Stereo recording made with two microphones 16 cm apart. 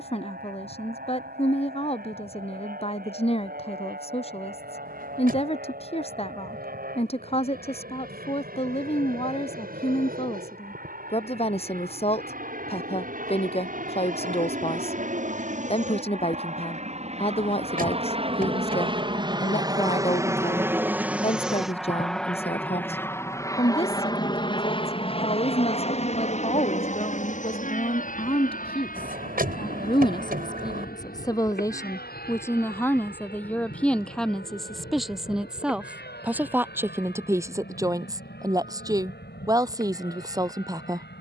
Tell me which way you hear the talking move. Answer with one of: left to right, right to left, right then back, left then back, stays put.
left to right.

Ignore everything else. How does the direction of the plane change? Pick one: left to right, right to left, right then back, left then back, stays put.
right to left.